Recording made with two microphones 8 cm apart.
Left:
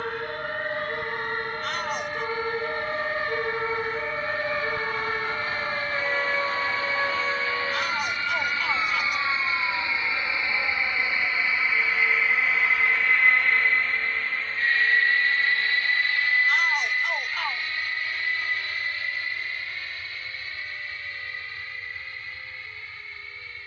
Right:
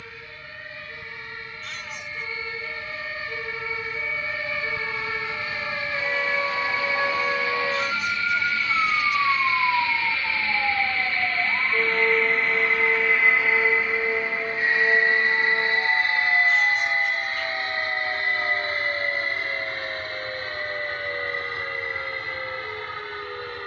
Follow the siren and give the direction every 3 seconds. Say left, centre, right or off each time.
left, left, centre, right, right, right, right, right.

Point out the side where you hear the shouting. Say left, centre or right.
left.